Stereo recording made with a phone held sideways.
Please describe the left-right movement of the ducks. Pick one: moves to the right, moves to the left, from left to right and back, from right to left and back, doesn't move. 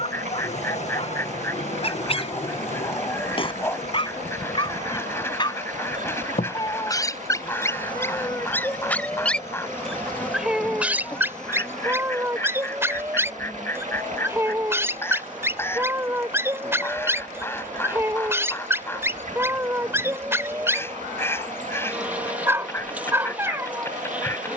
doesn't move.